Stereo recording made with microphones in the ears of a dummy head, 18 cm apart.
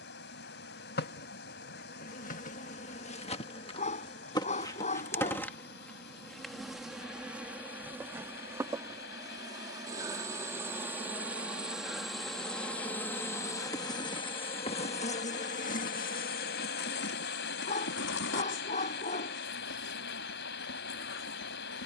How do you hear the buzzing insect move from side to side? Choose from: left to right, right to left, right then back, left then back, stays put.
right then back.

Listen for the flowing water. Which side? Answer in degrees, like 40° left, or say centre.
50° left.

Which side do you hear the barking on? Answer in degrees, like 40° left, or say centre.
40° left.